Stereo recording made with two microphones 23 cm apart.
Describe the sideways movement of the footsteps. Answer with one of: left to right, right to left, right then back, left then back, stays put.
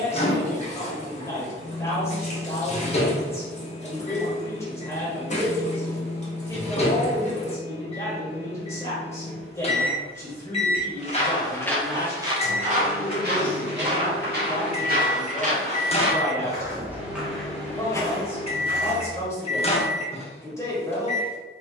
right then back.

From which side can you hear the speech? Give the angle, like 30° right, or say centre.
10° left.